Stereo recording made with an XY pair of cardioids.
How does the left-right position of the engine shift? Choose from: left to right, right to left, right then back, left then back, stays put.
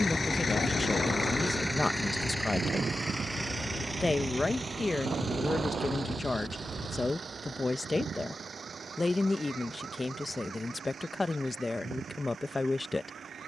left to right.